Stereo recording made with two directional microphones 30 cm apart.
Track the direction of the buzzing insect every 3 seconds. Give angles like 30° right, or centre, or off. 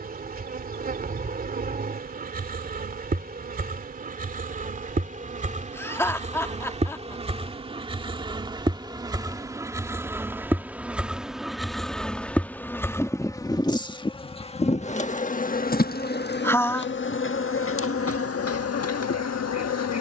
30° right, 30° right, 20° right, 10° right, 10° left, 40° left, 50° left.